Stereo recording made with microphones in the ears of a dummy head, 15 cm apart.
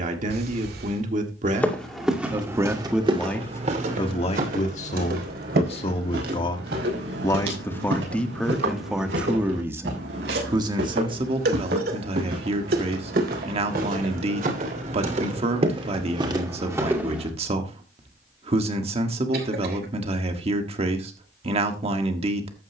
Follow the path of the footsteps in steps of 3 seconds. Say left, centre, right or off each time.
centre, right, right, right, right, right, off, off.